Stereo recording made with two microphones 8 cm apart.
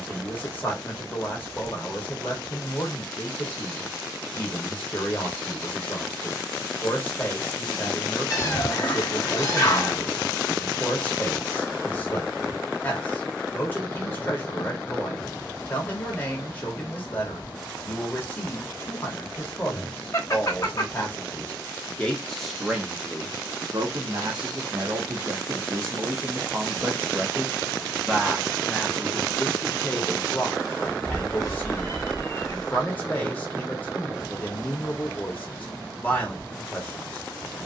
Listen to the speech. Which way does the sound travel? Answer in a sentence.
In this clip you hear the speech go right and come back.